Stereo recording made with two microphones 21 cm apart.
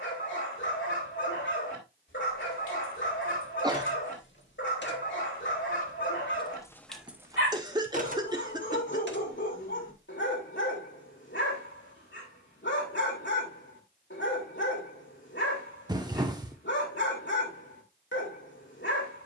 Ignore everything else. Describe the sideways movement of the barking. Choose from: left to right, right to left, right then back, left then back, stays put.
stays put.